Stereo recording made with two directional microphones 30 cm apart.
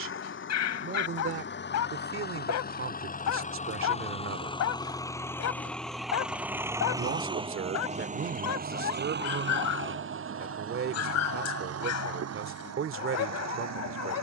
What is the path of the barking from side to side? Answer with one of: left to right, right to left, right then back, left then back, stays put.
stays put.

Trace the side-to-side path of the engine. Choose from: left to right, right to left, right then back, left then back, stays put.
left to right.